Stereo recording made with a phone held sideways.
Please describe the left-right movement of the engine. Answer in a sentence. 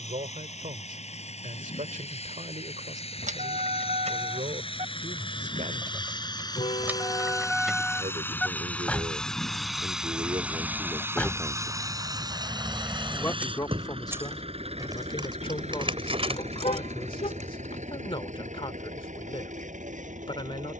You can hear the engine go from the left side to the right.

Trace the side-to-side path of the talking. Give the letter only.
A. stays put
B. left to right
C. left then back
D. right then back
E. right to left
E.